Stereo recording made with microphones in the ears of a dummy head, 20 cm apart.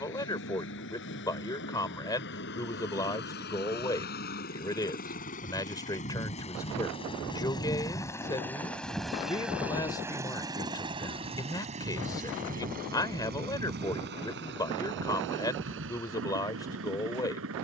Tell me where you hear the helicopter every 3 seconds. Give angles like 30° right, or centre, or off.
60° left, 50° left, 20° left, 20° right, 40° right, 60° right.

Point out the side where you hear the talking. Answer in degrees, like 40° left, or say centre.
20° left.